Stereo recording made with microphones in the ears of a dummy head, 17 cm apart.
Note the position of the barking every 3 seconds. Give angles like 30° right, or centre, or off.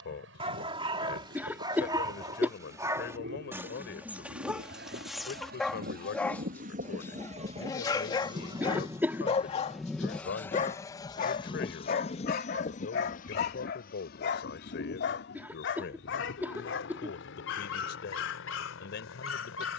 20° right, 10° right, 20° left, 40° left, 50° left, 70° left, 70° left.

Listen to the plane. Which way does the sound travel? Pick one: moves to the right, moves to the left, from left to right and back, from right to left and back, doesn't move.
moves to the left.